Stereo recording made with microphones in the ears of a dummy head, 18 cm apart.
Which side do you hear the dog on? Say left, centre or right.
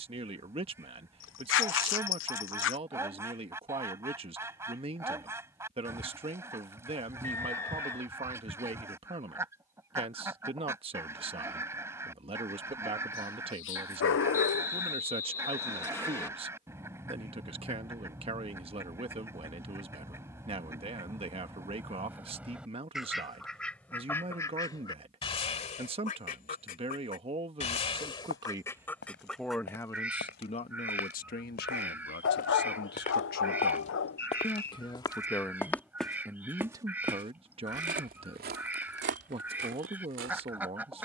left.